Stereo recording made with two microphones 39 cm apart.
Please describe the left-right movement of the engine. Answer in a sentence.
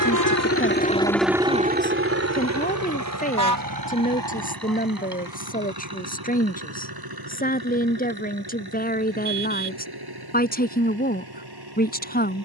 In this clip you hear the engine move from left to right.